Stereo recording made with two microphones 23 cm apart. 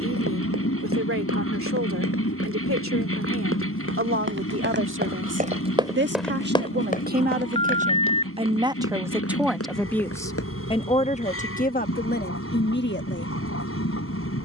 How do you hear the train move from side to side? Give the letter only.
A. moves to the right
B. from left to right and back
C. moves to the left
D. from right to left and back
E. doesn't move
E.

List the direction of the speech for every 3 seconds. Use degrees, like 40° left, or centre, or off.
70° right, 60° right, 40° right, 20° left, 50° left.